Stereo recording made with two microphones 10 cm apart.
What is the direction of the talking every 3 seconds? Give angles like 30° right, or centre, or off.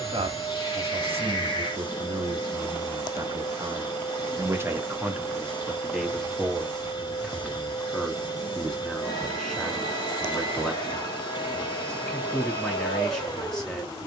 70° right, 30° right, 10° left, 10° left, 10° left.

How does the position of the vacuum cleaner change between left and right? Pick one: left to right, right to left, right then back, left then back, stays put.
stays put.